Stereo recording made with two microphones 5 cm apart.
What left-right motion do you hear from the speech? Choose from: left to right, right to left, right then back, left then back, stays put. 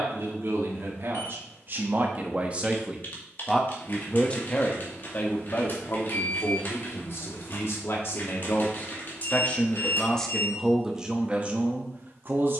left then back.